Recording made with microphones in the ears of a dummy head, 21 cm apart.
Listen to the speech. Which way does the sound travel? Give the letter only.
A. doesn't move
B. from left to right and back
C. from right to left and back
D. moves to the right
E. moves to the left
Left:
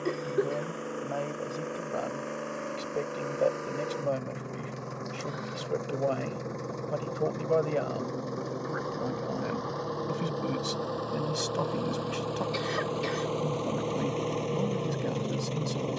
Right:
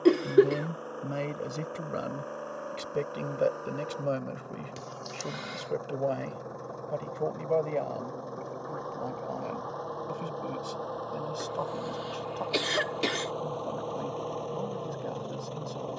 E.